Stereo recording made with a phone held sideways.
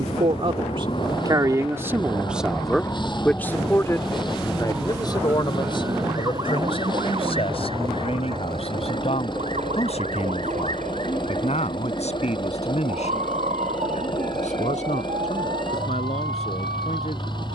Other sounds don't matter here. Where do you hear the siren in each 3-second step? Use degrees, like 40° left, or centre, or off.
40° left, 10° right, 40° right, 60° right, 70° right, 70° right.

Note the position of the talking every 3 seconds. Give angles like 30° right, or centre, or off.
20° right, 30° left, 50° left, 60° left, 60° left, 60° left.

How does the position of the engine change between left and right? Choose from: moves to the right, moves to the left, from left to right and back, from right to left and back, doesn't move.
doesn't move.